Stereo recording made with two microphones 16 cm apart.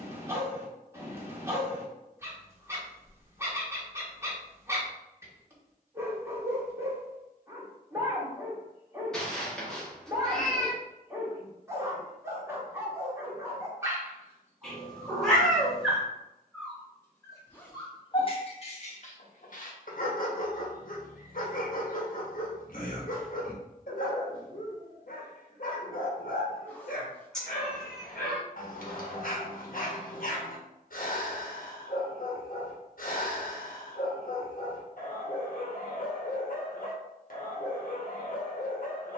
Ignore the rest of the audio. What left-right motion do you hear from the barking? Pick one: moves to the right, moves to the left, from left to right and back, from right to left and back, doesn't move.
moves to the left.